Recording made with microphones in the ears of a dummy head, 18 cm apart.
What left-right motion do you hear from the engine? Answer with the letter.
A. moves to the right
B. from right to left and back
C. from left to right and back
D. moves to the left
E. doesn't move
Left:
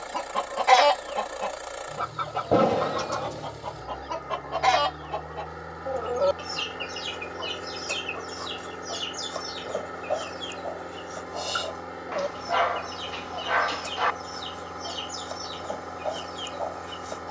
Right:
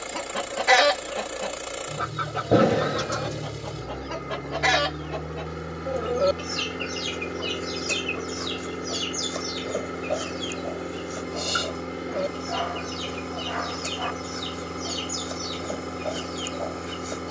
E.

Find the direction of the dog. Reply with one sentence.
In this clip you hear the dog on the left.